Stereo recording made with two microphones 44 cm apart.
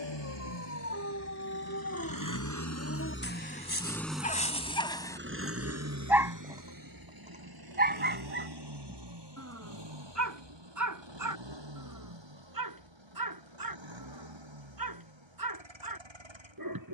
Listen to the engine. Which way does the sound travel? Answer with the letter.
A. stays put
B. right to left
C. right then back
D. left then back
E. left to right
E.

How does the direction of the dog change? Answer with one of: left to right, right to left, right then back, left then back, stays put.
left to right.